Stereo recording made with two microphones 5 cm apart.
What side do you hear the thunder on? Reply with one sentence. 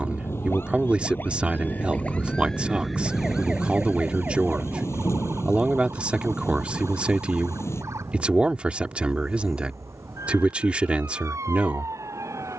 In this clip you hear the thunder on the left.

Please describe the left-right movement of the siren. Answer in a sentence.
In this clip you hear the siren go from the left side to the right.